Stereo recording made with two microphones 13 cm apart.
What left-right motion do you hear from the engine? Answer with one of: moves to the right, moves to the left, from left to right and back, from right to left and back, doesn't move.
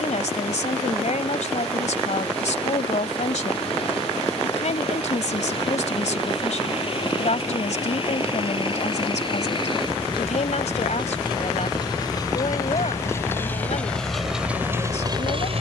moves to the right.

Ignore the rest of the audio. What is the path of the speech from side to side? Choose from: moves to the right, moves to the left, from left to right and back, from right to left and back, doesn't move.
doesn't move.